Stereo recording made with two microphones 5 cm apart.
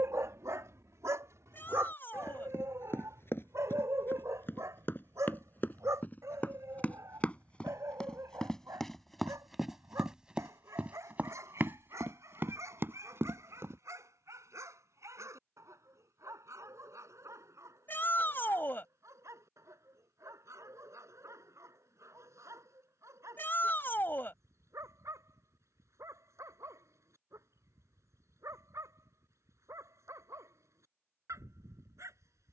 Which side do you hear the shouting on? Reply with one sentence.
You can hear the shouting on the left.